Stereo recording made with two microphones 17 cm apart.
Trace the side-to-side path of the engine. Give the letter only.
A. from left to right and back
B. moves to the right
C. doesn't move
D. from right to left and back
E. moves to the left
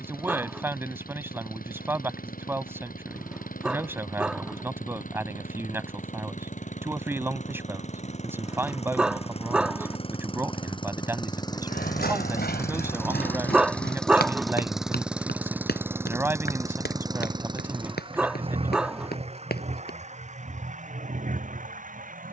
B.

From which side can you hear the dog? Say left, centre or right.
centre.